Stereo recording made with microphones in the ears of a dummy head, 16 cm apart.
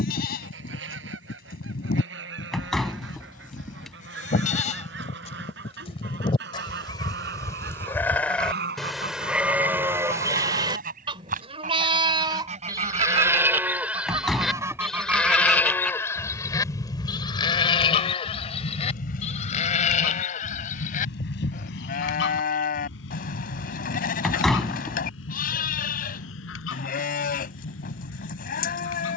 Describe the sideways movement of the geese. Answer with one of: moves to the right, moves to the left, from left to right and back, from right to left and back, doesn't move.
moves to the left.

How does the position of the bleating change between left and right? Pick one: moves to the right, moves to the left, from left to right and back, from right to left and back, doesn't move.
from left to right and back.